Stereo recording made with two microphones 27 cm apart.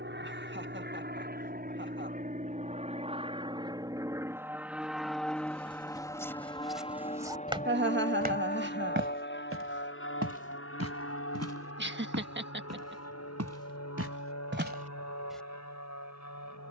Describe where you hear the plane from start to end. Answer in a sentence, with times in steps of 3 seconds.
In this clip you hear the plane on the right from 0 s, in the centre from 3 s and on the left from 6 s.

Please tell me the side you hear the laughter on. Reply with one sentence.
In this clip you hear the laughter on the right.